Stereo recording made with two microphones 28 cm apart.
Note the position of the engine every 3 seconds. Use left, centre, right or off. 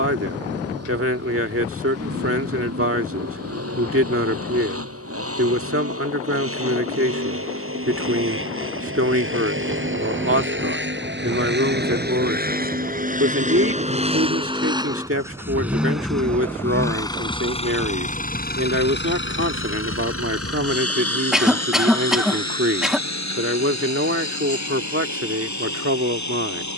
right, right, right, right, right, centre, left, left, left.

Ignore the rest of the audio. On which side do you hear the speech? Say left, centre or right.
right.